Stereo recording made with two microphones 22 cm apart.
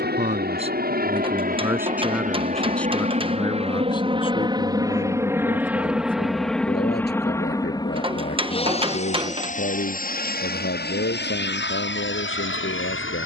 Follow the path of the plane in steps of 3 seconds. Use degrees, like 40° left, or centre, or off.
40° right, 20° right, 10° left, 40° left, 50° left.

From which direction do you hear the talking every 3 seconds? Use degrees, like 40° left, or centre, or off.
10° right, 30° left, 50° left, 60° left, 60° left.